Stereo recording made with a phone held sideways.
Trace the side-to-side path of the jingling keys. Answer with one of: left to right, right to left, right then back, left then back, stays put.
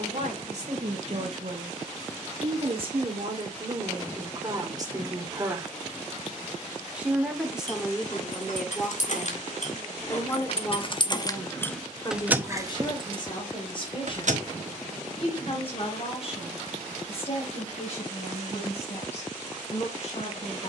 left to right.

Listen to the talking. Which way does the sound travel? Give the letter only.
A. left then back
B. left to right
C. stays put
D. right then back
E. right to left
E.